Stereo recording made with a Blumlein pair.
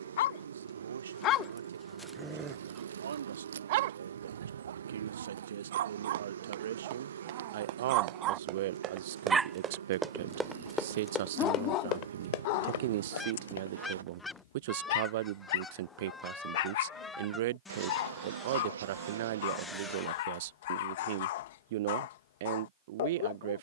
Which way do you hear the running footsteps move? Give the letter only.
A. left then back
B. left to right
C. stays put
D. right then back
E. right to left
E.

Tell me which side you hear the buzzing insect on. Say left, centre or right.
right.